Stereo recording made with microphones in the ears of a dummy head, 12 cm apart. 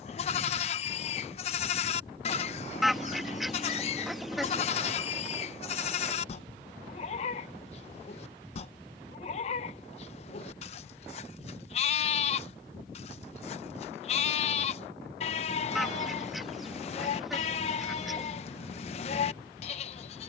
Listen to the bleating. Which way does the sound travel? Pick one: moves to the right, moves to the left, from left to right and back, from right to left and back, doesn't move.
doesn't move.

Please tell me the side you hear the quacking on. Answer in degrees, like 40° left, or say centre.
centre.